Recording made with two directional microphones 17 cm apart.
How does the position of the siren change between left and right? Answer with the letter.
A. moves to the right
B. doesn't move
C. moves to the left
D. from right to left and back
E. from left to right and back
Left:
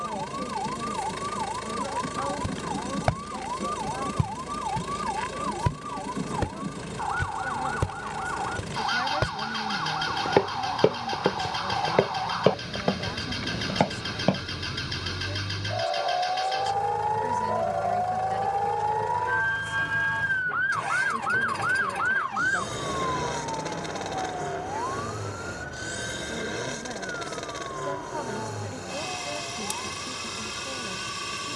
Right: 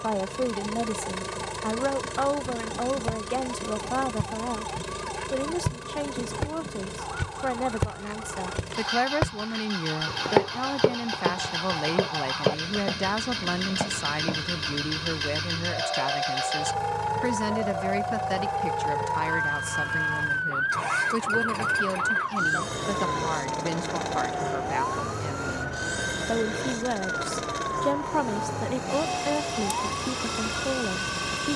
A.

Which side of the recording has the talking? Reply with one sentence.
You can hear the talking on the right.